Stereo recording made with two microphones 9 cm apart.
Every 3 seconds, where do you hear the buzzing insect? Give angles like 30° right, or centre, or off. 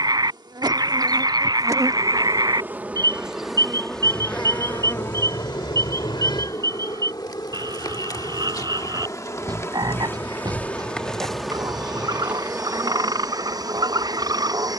40° right, 10° left, 40° left, 20° left, 30° right.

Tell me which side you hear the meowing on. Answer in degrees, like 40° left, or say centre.
60° left.